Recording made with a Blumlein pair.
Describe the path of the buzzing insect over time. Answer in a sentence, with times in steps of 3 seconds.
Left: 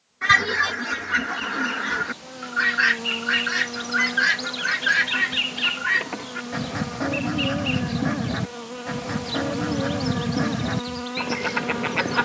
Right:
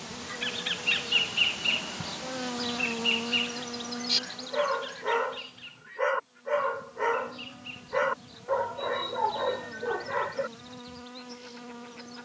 You can hear the buzzing insect on the right from 0 s and on the left from 3 s.